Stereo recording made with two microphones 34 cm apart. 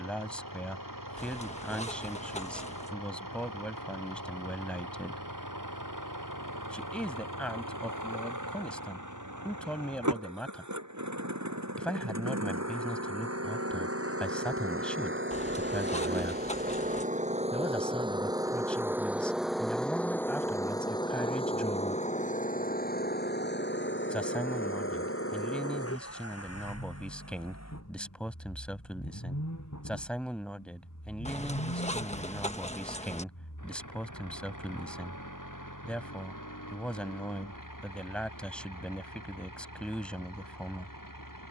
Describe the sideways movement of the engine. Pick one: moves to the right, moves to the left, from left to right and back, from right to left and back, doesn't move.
moves to the left.